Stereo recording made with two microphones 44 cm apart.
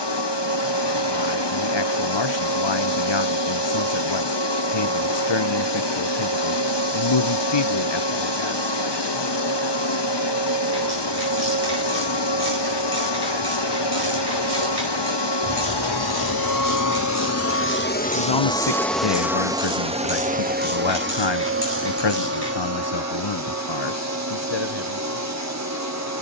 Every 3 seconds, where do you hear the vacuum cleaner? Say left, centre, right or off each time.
left, left, left, left, left, left, centre, right, right.